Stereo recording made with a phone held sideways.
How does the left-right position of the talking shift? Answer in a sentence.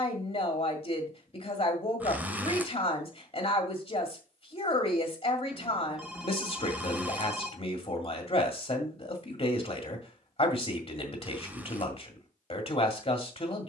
In this clip you hear the talking stay put.